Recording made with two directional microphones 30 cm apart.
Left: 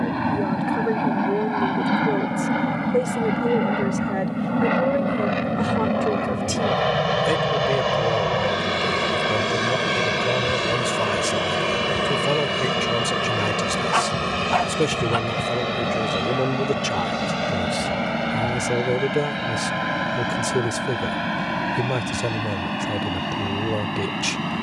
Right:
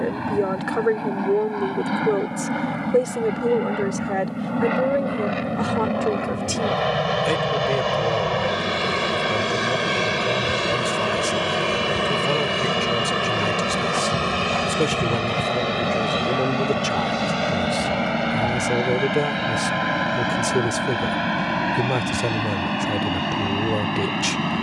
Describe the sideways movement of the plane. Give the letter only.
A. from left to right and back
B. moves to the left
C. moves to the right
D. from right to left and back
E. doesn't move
C.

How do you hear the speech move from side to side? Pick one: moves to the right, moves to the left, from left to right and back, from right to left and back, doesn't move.
from right to left and back.